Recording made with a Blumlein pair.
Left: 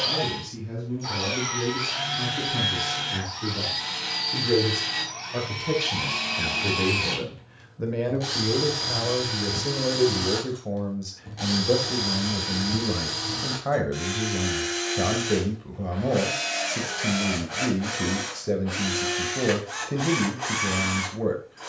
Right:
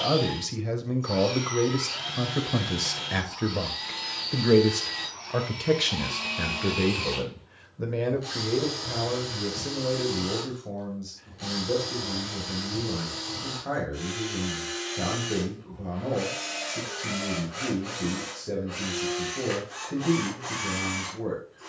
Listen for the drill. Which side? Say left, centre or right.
left.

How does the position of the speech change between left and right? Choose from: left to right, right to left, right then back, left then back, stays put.
right to left.